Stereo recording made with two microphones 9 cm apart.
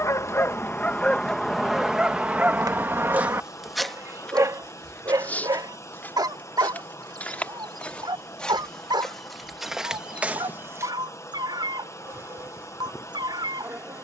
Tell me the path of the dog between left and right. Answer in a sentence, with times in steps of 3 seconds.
You can hear the dog in the centre from 0 s and on the right from 3 s.